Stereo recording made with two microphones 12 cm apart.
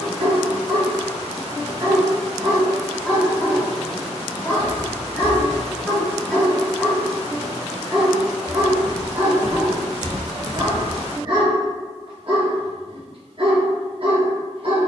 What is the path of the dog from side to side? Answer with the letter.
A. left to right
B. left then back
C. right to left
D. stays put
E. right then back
B.